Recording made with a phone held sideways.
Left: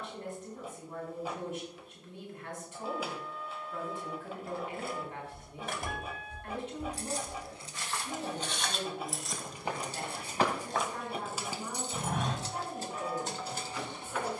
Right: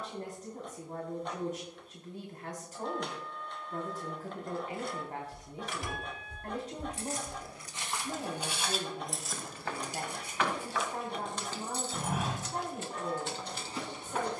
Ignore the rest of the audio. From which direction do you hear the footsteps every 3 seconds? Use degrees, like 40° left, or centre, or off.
off, off, 20° right, 20° left, 30° right.